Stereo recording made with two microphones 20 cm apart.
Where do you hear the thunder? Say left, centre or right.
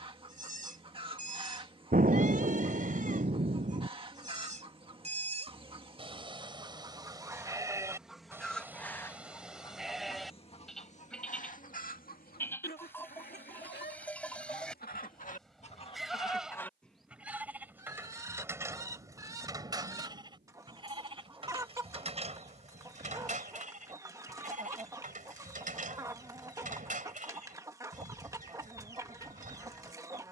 right.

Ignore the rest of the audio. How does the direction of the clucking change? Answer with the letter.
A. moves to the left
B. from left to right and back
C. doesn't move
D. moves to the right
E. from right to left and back
E.